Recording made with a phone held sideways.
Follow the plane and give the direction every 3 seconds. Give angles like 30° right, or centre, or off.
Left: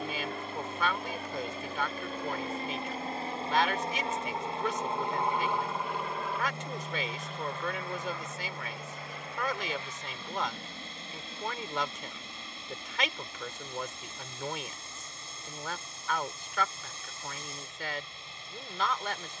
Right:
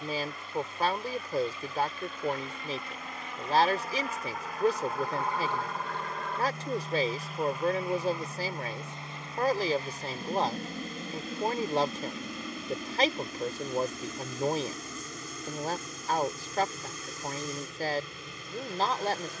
50° left, 30° left, 10° right, 40° right, 50° right, 60° right, 70° right.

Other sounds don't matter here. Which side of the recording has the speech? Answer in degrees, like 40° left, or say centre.
40° right.